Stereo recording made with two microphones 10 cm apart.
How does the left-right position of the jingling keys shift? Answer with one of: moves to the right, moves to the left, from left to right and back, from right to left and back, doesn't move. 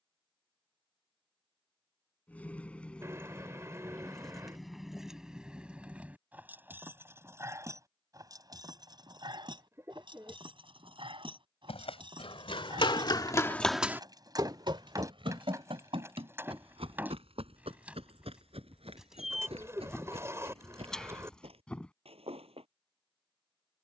from left to right and back.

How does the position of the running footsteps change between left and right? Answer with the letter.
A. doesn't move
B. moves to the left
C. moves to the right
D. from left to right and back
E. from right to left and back
C.